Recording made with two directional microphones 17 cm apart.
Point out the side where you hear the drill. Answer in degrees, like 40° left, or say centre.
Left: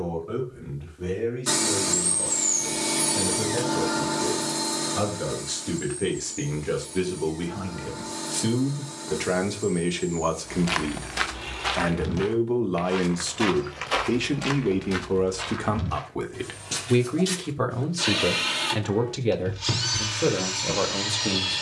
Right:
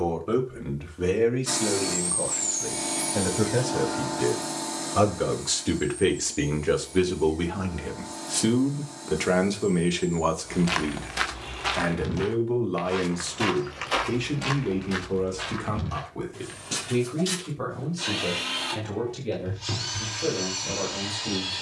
30° left.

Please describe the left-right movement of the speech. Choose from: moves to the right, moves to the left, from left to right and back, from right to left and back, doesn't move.
moves to the left.